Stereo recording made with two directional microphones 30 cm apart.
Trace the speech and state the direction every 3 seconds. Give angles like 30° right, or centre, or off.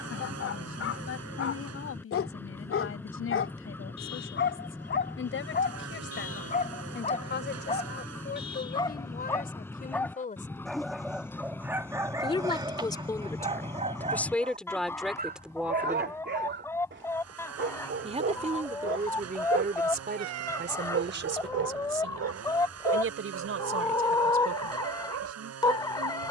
50° left, 50° left, 40° left, 30° left, 10° left, centre, 30° right, 50° right, 60° right.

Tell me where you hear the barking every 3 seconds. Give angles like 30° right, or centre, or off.
50° left, 40° left, 20° left, centre, 20° right, 40° right, 50° right, 60° right, 60° right.